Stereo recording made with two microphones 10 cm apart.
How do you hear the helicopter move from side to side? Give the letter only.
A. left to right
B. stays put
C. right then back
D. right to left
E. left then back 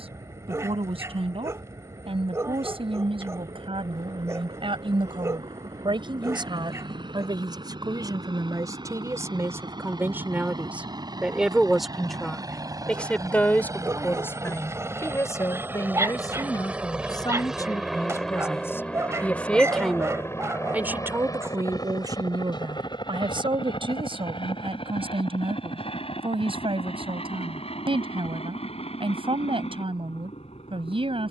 D.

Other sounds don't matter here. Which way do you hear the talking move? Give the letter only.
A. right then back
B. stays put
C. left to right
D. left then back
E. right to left
D.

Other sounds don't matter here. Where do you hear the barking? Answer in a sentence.
In this clip you hear the barking on the right.